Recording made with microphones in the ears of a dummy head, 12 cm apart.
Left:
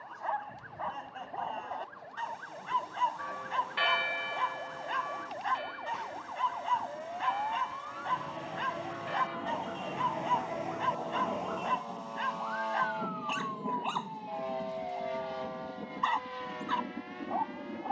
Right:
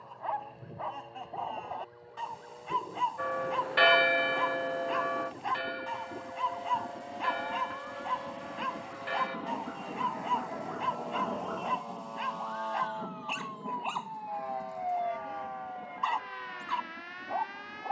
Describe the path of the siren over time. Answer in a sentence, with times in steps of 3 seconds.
You can hear the siren on the left from 0 s and on the right from 12 s.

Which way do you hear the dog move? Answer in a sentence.
You can hear the dog stay in one place.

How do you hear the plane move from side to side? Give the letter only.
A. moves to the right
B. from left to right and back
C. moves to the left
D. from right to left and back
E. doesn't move
C.